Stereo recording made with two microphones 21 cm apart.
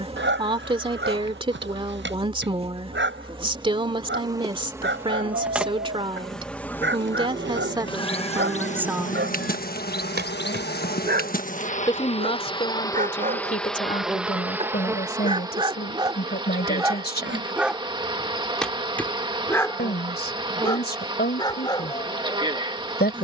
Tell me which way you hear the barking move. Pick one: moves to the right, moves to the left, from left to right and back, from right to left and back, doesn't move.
moves to the left.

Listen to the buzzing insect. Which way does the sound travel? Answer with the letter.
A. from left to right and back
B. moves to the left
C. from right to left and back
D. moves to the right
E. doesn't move
C.